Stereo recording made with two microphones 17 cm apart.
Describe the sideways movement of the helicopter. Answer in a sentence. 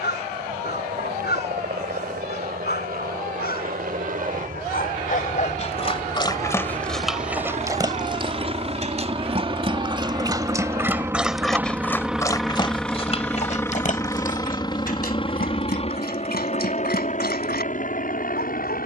In this clip you hear the helicopter move to the left.